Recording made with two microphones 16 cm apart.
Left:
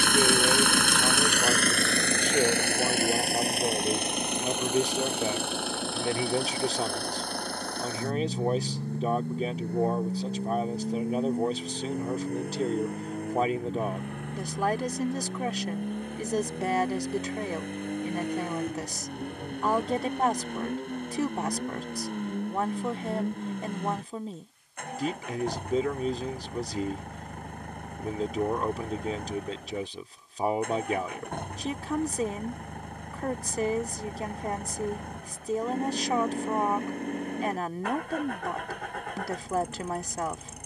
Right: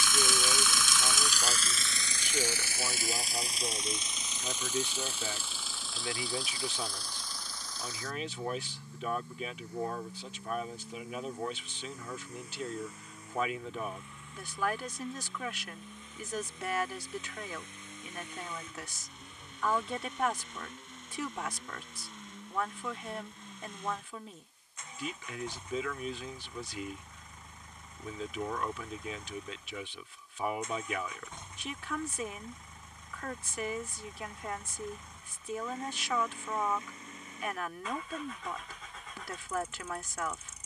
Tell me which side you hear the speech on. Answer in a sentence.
You can hear the speech on the left.